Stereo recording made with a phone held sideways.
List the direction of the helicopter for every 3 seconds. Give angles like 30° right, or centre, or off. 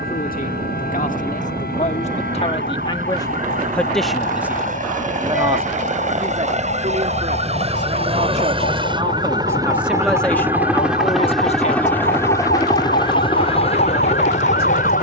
60° right, 50° right, 40° right, 10° right, 30° left.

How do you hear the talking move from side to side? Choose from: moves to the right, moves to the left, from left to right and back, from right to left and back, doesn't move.
from left to right and back.